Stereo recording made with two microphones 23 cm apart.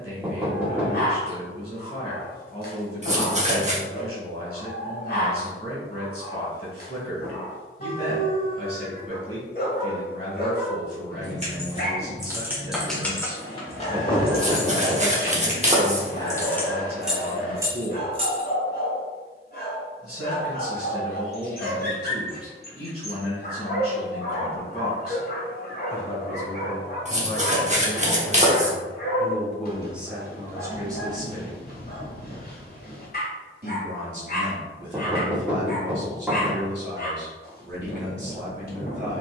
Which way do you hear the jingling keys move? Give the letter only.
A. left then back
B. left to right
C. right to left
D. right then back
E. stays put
A.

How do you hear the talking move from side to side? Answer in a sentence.
You can hear the talking go from the left side to the right.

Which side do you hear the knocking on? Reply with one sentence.
In this clip you hear the knocking in the centre.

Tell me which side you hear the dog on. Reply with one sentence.
You can hear the dog on the left.